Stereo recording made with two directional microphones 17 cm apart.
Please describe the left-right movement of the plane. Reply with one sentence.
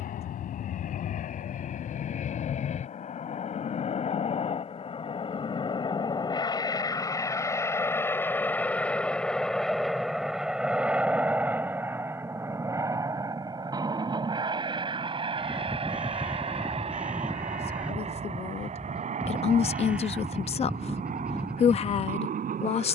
In this clip you hear the plane go from the left side to the right.